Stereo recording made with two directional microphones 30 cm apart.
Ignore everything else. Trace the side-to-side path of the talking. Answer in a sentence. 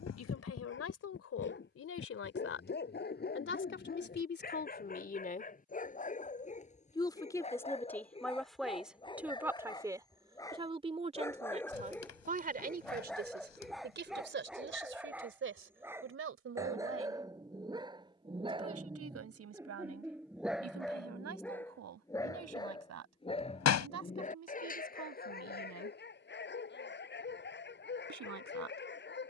You can hear the talking travel towards the right.